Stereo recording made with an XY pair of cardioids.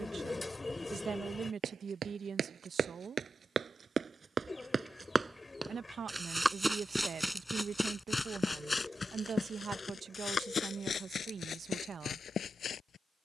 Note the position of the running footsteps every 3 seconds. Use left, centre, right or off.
right, right, centre, left, left.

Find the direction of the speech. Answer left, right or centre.
right.